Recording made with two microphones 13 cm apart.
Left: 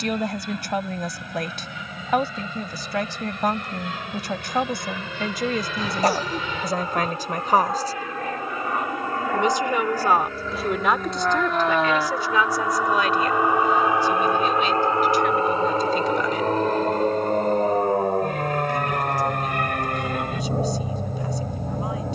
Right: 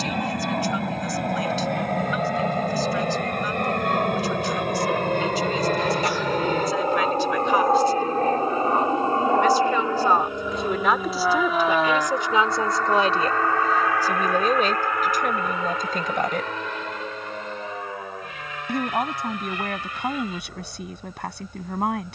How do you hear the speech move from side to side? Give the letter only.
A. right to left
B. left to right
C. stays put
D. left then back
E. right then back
B.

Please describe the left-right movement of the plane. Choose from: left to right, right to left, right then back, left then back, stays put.
right to left.